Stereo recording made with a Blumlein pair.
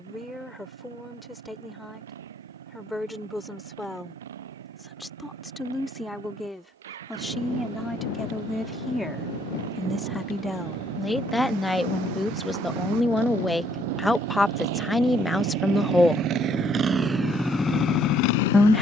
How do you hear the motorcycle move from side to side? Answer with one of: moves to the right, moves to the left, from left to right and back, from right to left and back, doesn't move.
moves to the left.